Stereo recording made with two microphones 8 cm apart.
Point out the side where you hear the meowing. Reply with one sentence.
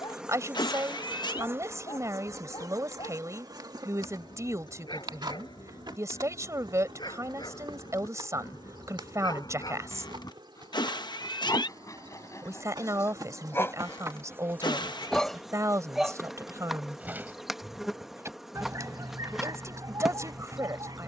You can hear the meowing on the left.